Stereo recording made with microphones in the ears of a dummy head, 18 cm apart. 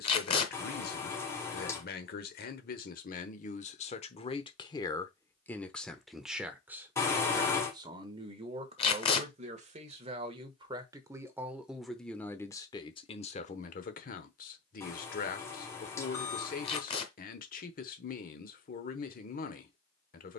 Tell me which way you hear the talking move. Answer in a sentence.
You can hear the talking go right and come back.